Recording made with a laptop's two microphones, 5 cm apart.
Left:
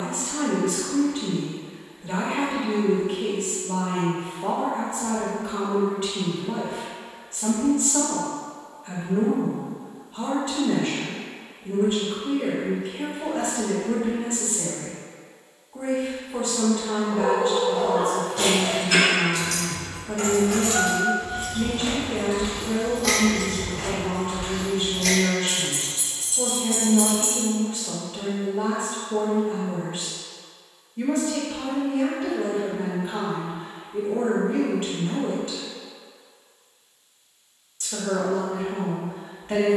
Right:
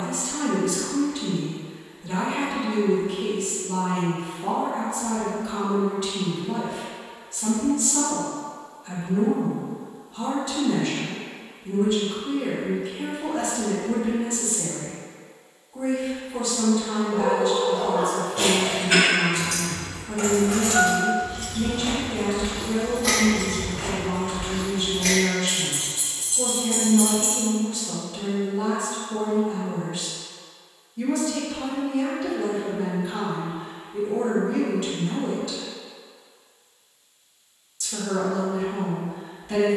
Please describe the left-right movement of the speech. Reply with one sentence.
You can hear the speech stay put.